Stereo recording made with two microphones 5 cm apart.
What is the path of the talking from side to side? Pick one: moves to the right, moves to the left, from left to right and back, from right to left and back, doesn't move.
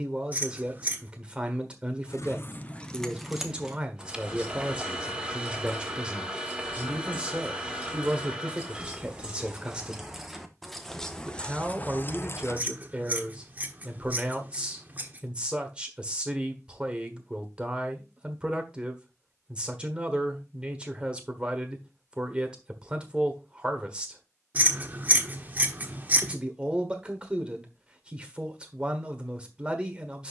doesn't move.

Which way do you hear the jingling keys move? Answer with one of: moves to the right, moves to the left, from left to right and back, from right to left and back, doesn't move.
from left to right and back.